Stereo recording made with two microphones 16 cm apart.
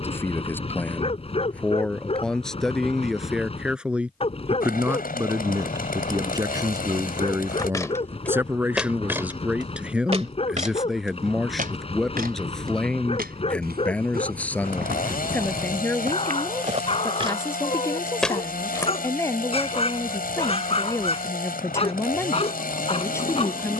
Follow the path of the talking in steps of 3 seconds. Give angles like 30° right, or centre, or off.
10° left, 10° right, 20° right, centre, 10° left, 10° left, 20° left, 20° left.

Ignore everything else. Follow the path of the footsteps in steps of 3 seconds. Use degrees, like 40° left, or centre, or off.
off, off, 10° left, 40° right, 70° right, 50° right, 10° left, off.